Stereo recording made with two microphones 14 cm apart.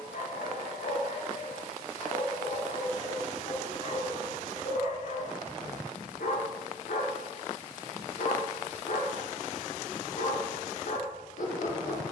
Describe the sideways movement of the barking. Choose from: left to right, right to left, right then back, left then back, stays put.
stays put.